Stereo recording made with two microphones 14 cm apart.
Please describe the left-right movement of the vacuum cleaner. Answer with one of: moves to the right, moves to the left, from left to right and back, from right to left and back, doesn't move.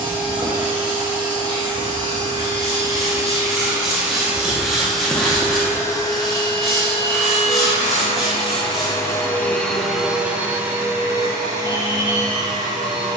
from right to left and back.